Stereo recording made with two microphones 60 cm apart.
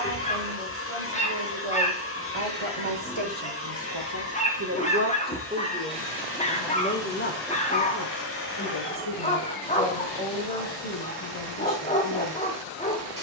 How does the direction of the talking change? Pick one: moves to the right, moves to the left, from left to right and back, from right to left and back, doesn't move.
moves to the left.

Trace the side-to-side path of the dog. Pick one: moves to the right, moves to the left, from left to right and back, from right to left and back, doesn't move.
doesn't move.